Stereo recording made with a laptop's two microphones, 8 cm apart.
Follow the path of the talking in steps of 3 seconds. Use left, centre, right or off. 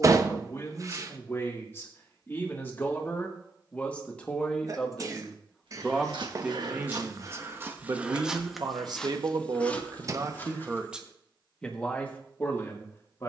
left, centre, right, right, left.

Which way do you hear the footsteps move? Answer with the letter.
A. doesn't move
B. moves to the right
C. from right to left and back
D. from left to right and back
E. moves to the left
E.